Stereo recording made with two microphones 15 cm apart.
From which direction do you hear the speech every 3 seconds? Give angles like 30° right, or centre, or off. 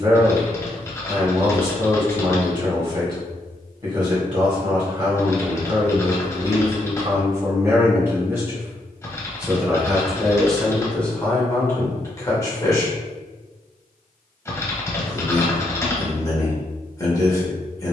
30° right, 30° right, 20° right, 10° left, 20° left, 20° left.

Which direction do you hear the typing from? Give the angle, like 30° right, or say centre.
20° left.